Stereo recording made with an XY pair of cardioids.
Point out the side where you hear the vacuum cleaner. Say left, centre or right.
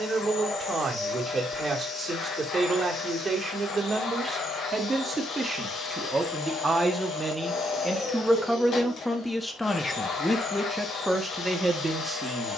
left.